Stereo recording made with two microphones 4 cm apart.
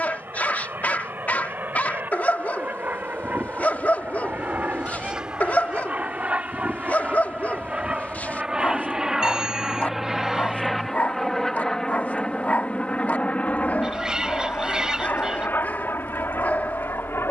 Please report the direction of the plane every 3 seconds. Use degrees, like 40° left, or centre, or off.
50° right, 40° right, 30° right, centre, 30° left, 50° left.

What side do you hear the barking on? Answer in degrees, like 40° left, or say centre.
40° left.